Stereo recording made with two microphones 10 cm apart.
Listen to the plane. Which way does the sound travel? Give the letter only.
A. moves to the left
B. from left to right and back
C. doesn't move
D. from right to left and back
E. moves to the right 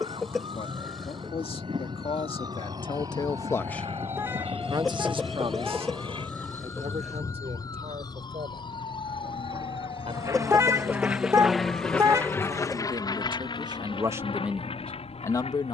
A.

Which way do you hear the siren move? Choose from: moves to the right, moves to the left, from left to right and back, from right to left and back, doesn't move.
moves to the left.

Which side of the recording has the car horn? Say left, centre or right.
right.